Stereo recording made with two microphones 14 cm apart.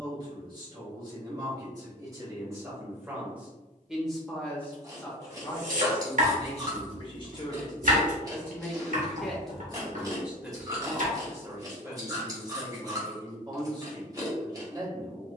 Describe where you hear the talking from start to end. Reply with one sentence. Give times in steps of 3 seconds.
You can hear the talking on the right from 0 s, in the centre from 3 s, on the left from 6 s, in the centre from 9 s and on the right from 12 s.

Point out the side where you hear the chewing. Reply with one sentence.
In this clip you hear the chewing on the right.